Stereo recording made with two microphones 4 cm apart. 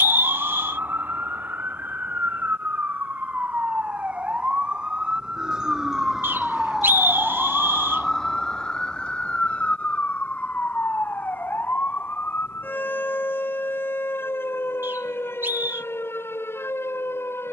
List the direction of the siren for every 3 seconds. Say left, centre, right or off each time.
right, right, centre, left, left, left.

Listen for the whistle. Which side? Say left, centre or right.
right.